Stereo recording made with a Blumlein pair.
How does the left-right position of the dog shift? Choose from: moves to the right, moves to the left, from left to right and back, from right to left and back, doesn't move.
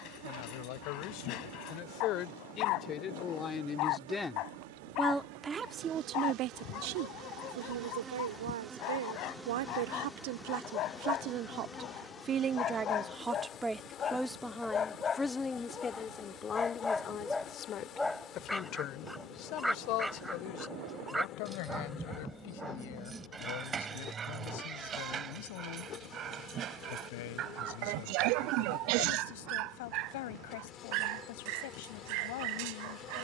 moves to the right.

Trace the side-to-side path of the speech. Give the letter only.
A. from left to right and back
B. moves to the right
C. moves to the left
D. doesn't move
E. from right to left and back
A.